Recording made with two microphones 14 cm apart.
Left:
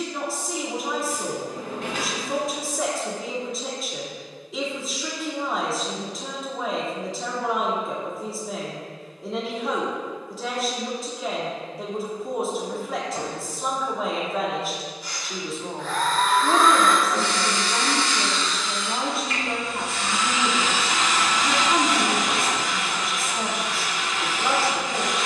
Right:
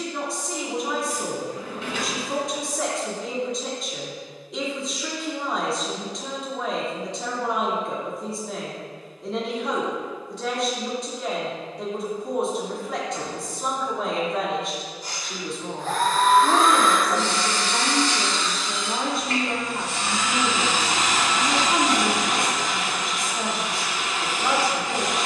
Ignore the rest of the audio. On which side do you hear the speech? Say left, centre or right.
centre.